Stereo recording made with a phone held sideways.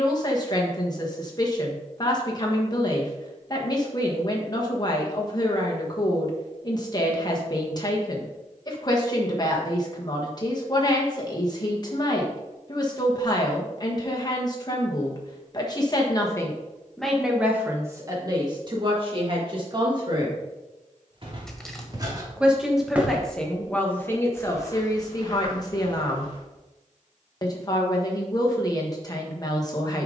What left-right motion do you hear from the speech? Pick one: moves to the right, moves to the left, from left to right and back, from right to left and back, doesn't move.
from left to right and back.